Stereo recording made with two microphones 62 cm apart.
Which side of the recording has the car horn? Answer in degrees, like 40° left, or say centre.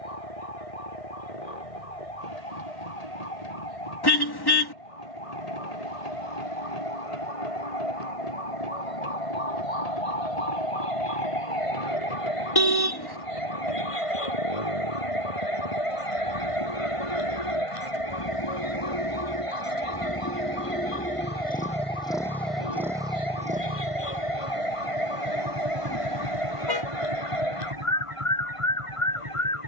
40° left.